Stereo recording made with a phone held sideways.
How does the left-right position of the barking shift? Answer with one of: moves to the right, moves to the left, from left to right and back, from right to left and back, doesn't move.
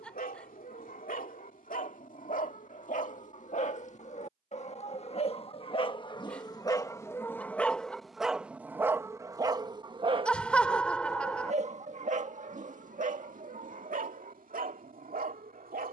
moves to the right.